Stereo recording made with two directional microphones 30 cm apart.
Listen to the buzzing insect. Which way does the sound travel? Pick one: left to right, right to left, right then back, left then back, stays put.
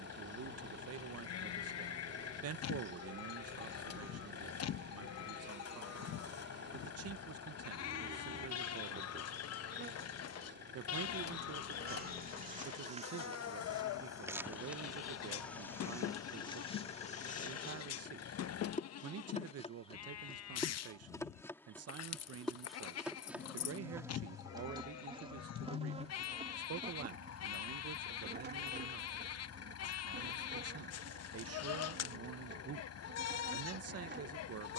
left then back.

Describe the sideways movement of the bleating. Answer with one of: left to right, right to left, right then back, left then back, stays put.
stays put.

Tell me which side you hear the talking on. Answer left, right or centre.
right.